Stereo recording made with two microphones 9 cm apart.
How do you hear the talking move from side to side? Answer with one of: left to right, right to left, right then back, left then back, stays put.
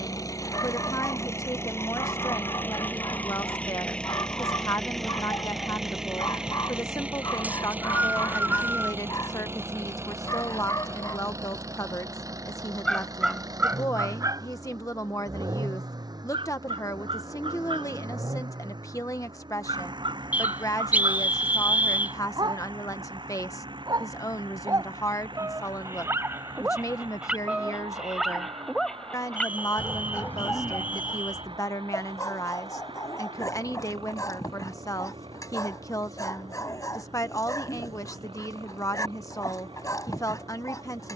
stays put.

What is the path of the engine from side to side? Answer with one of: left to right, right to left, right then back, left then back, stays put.
left to right.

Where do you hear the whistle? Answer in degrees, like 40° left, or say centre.
20° right.